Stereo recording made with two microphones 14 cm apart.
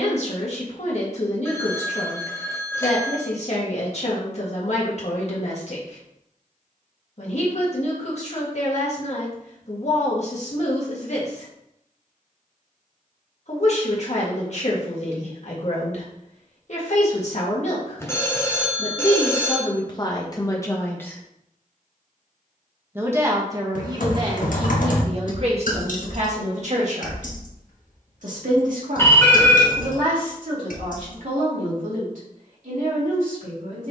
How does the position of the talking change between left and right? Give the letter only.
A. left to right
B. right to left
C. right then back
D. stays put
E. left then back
A.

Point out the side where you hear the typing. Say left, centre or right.
left.